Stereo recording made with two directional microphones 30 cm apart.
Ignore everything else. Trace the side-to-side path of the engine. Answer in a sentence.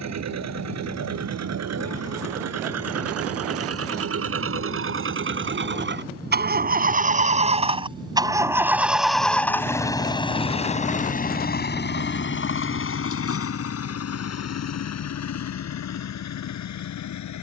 You can hear the engine move from right to left.